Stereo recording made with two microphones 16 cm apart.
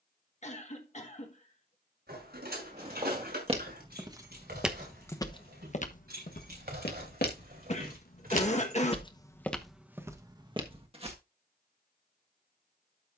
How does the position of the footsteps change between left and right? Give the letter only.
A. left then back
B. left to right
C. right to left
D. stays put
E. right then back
A.